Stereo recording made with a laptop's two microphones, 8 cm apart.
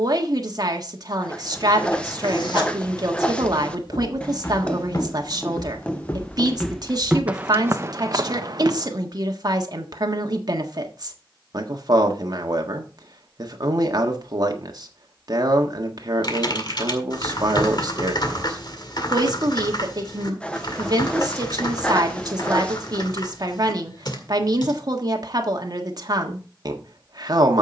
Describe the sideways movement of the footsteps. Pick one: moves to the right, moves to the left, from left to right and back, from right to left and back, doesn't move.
moves to the right.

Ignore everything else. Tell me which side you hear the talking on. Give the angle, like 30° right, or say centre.
50° right.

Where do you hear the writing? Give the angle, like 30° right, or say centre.
10° left.